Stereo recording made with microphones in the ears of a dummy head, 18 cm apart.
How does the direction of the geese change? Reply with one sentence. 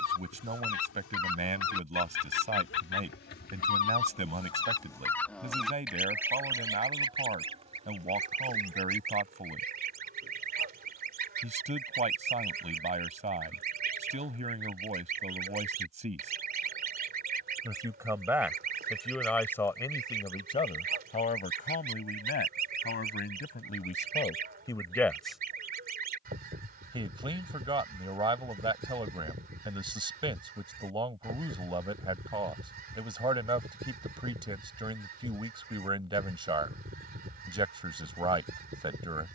In this clip you hear the geese move to the right.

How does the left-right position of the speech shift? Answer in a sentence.
You can hear the speech go left and come back.